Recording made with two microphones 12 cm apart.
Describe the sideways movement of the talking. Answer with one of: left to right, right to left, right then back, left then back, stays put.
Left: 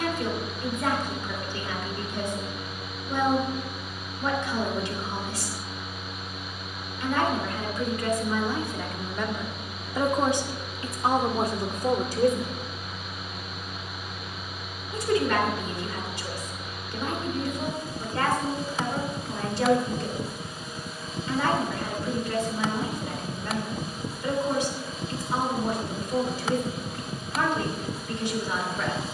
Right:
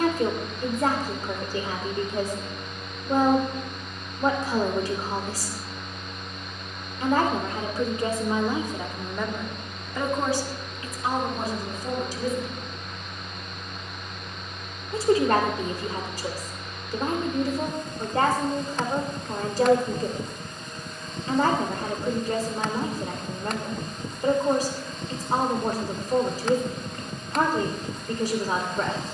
left then back.